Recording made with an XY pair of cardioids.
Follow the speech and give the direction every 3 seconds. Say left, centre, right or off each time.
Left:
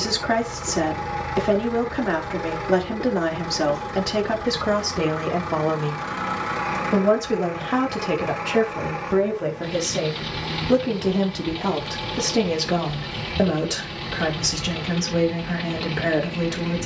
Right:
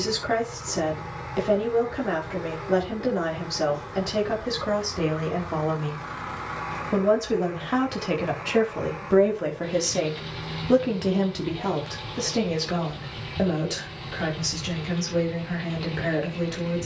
left, left, centre, centre, left, left.